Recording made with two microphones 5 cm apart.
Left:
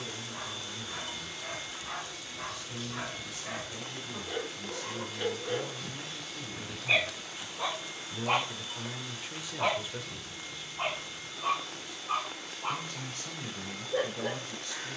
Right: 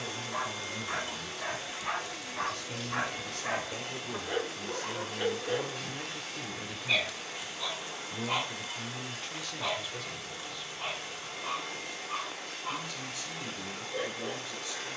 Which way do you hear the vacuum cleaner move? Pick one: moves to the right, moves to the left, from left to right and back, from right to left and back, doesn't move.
doesn't move.